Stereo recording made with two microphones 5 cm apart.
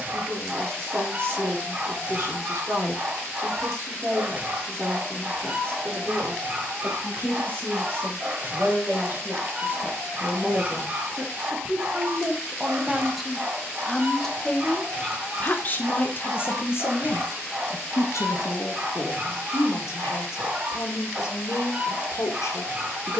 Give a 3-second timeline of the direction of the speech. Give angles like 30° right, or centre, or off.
50° right, 50° right, 40° right, 30° right, centre, 50° left, 70° left, 70° left.